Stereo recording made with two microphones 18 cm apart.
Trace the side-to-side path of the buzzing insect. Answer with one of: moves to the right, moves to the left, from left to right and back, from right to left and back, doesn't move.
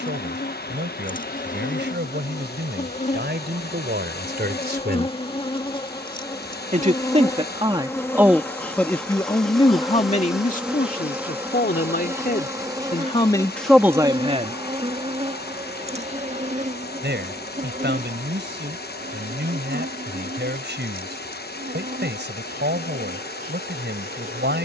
moves to the right.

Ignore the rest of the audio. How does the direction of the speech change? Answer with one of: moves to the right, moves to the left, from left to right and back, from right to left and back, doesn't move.
from right to left and back.